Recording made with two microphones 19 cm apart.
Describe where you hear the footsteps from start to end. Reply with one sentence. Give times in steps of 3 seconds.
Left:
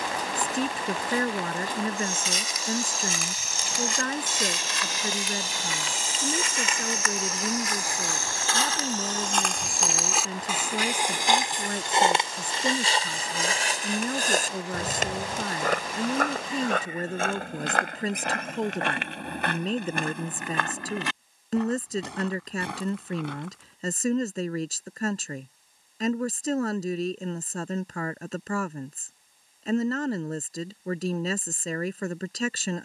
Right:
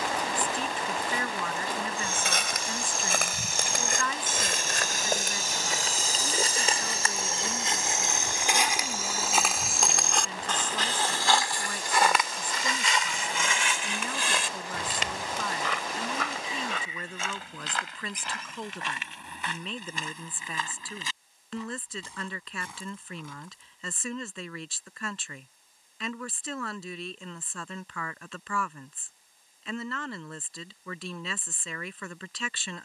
In this clip you hear the footsteps on the right from 0 s, in the centre from 9 s, on the left from 12 s and not at all from 24 s.